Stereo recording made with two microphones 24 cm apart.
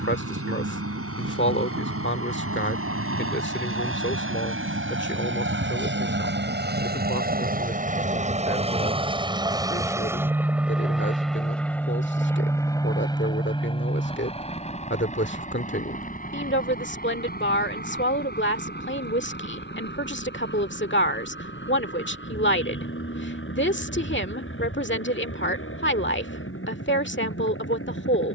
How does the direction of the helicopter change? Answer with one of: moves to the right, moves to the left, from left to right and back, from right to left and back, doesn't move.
moves to the left.